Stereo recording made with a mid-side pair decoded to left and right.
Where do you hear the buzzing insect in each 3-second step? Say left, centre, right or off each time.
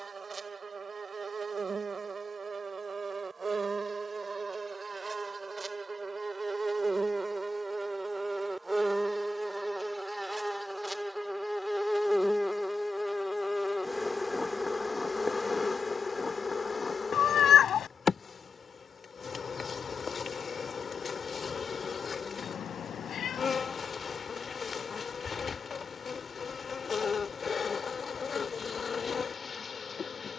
right, right, right, centre, centre, left, left, left, left, left.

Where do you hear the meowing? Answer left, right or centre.
left.